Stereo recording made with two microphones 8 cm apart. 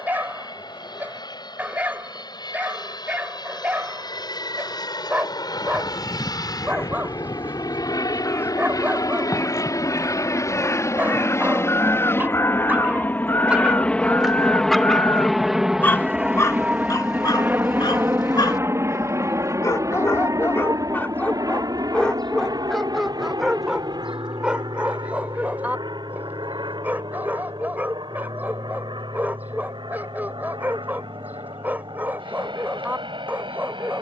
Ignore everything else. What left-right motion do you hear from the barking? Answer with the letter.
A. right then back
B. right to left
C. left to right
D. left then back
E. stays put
D.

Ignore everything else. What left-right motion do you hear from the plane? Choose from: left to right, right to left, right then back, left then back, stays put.
left to right.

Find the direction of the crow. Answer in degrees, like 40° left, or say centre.
30° left.